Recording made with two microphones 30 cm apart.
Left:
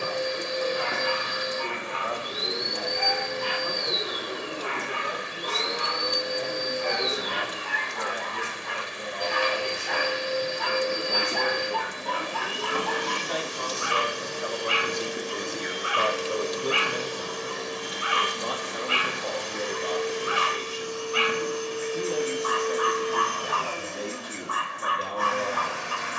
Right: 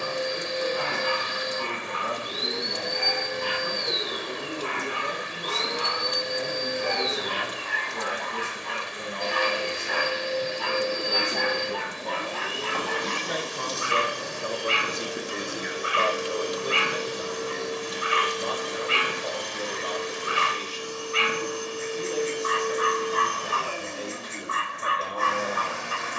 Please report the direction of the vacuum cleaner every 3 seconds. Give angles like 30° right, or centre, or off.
20° left, 20° left, 20° left, 20° left, 10° left, 20° right, 40° right, 50° right, 50° right.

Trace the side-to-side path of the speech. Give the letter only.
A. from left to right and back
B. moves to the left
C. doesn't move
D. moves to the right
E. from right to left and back
B.